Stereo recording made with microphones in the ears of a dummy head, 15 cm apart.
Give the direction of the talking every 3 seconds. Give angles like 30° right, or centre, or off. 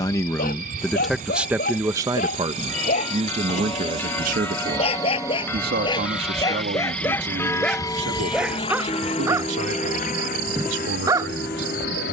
10° right, 50° right, 70° right, 70° right.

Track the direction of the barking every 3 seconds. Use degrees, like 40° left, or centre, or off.
50° left, 40° left, 10° left, 20° right.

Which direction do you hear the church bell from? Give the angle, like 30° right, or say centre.
10° left.